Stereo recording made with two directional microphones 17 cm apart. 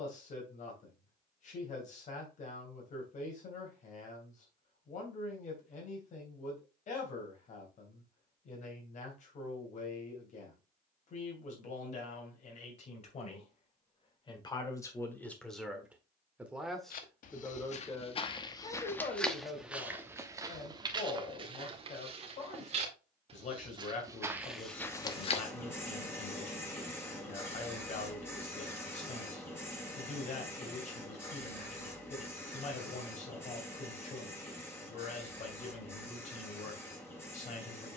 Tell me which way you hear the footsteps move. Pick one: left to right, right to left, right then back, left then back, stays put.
right then back.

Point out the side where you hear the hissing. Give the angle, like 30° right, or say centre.
10° left.